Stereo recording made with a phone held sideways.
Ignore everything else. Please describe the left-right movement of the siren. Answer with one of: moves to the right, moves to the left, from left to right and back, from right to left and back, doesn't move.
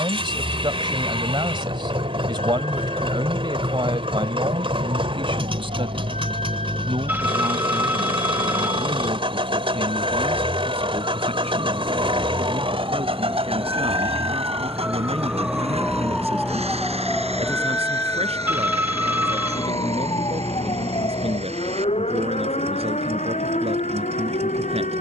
moves to the left.